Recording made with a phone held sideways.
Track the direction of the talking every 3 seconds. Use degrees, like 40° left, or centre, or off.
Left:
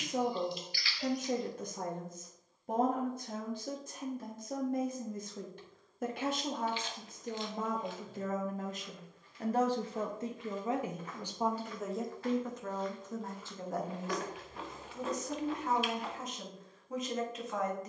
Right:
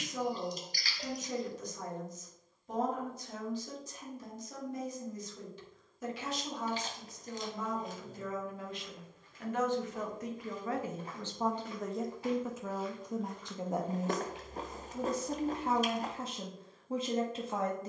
60° left, 60° left, 60° left, 20° left, 20° right, 30° right.